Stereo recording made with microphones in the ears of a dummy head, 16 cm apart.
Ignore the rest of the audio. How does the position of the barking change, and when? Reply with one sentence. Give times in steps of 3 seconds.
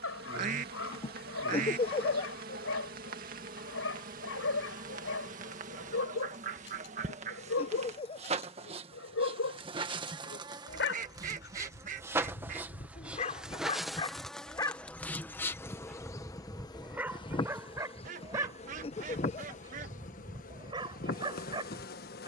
In this clip you hear the barking on the left from 0 s, in the centre from 15 s and on the right from 18 s.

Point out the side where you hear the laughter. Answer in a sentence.
In this clip you hear the laughter on the left.